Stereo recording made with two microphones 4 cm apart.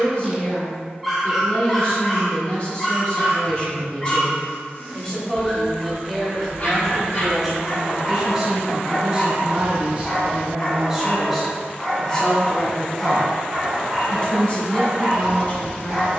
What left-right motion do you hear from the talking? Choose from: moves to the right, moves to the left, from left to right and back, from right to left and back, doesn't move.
from left to right and back.